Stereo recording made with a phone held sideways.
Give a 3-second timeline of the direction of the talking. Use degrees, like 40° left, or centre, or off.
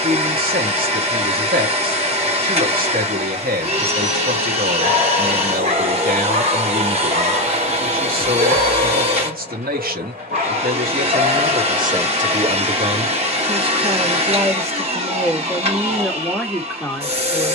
60° right, 60° right, 60° right, 50° right, 30° right, centre.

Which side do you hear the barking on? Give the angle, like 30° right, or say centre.
50° right.